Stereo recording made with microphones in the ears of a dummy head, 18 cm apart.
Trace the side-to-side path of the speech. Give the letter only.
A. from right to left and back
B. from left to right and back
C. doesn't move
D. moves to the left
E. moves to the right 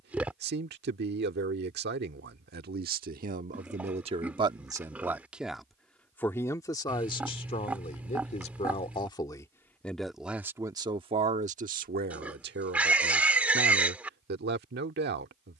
A.